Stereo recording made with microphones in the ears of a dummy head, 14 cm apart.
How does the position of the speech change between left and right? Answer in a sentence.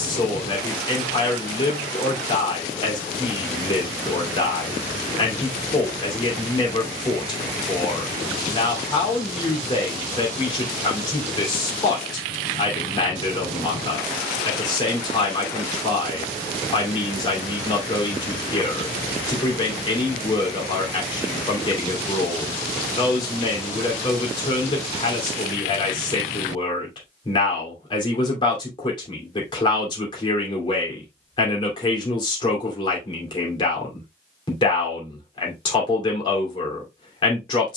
In this clip you hear the speech stay in one place.